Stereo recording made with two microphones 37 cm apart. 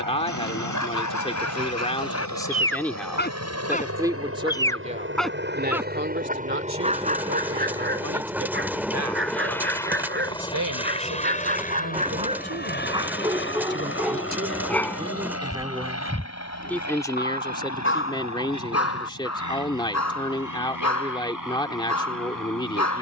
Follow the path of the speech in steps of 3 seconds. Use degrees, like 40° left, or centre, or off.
10° left, 10° right, 40° right, 50° right, 30° right, centre, 10° left, 10° left.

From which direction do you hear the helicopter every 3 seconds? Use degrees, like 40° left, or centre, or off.
50° right, 40° right, 10° right, 10° left, 30° left, 40° left, 50° left, 50° left.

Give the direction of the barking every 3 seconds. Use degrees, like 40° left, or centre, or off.
50° left, 10° left, 20° right, 30° right, 10° right, 20° left, 40° left, 50° left.